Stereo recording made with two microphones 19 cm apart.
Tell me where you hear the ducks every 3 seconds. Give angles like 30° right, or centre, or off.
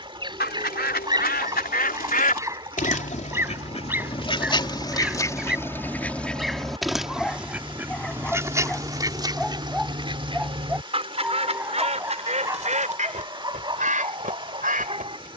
50° left, 30° left, 10° right, 30° right, 40° right.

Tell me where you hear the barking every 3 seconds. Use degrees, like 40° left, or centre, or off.
20° right, 10° right, centre, 10° right, 20° right.